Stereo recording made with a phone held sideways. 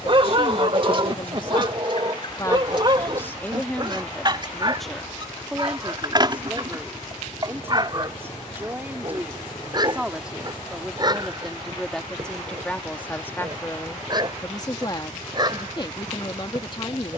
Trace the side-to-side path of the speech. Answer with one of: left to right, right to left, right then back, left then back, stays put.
right then back.